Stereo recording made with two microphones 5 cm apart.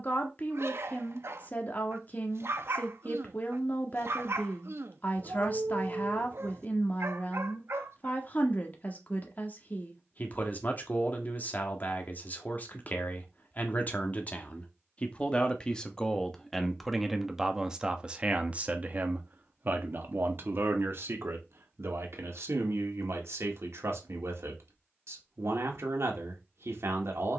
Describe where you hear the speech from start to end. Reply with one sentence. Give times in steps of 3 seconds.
In this clip you hear the speech on the left from 0 s, in the centre from 15 s and on the right from 18 s.